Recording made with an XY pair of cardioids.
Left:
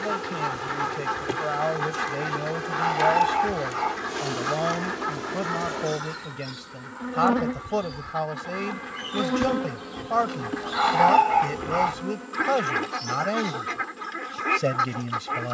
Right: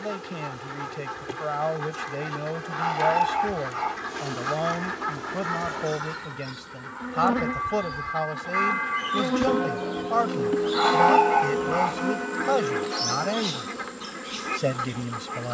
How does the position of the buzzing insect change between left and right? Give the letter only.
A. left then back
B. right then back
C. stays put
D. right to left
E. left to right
E.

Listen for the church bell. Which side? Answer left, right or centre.
right.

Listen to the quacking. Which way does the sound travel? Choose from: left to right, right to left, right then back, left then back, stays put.
right then back.